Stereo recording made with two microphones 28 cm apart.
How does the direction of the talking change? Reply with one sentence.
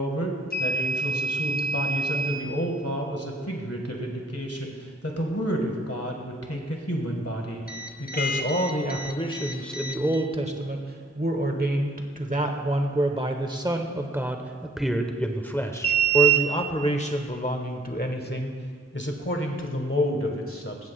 You can hear the talking go right and come back.